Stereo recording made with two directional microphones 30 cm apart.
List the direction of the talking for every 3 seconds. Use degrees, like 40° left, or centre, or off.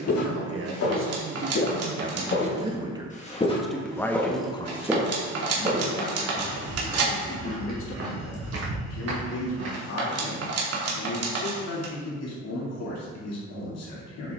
40° right, 10° left, 40° left, 60° left, 60° left.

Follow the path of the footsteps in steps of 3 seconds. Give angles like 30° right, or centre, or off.
50° left, centre, 40° right, 50° right, off.